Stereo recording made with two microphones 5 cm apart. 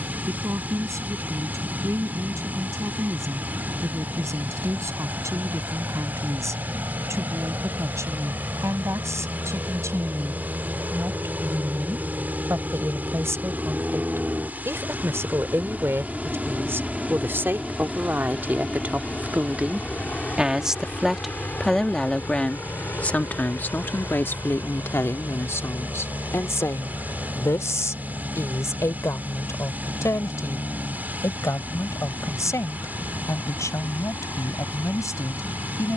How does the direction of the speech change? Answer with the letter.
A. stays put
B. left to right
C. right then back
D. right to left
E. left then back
D.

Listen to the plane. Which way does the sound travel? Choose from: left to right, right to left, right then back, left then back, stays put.
right to left.